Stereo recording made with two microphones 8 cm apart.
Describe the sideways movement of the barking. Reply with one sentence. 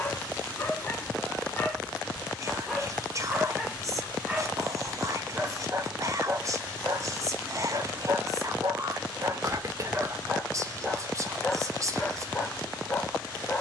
In this clip you hear the barking go right and come back.